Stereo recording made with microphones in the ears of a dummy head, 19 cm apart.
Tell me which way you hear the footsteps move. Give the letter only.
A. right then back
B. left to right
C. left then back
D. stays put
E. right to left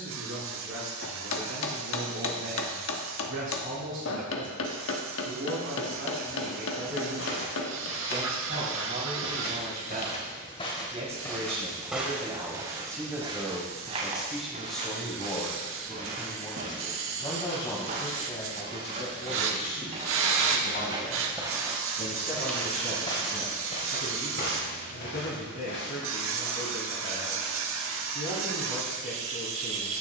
A.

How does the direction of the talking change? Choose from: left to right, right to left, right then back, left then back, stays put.
right to left.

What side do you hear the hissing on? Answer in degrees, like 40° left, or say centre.
70° right.